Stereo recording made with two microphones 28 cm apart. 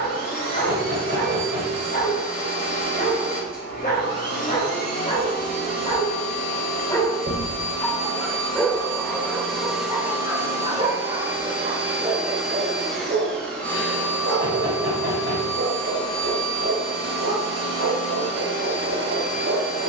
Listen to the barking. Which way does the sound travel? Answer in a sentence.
You can hear the barking travel towards the right.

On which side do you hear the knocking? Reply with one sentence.
You can hear the knocking on the right.